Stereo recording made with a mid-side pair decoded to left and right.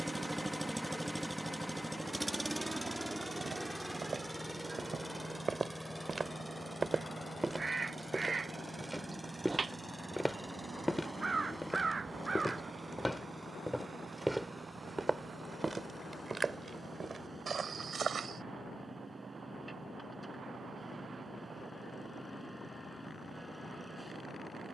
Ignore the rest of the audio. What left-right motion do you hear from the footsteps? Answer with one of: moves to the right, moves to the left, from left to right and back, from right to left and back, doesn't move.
from right to left and back.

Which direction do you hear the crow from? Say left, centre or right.
right.